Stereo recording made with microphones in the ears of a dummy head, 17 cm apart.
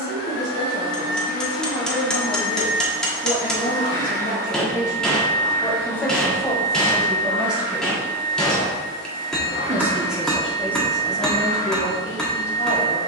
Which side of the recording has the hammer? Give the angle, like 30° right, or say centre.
centre.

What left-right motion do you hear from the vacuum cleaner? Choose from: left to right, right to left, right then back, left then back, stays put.
stays put.